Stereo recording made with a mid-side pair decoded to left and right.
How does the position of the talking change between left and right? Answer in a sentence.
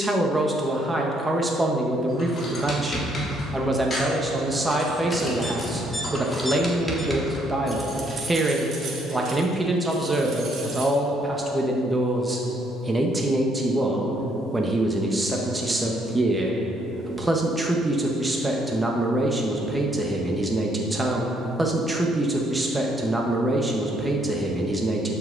You can hear the talking stay in one place.